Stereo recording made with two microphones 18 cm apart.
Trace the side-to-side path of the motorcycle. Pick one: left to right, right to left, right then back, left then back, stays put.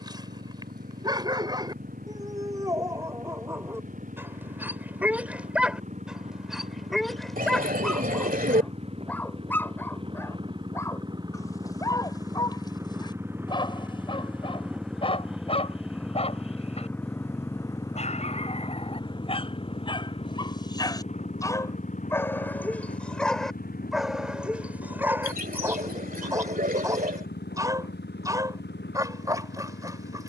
right to left.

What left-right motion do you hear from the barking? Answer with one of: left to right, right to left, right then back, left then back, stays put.
left then back.